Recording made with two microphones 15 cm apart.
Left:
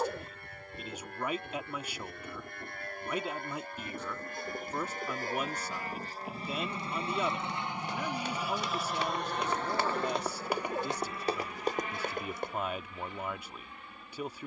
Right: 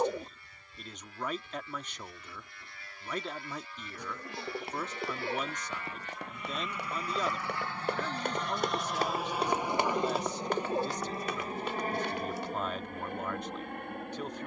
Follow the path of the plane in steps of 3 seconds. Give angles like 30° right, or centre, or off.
60° left, 50° left, 20° left, 20° right, 50° right.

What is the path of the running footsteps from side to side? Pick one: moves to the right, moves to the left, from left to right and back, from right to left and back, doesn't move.
moves to the left.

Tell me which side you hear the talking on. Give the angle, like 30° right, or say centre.
10° left.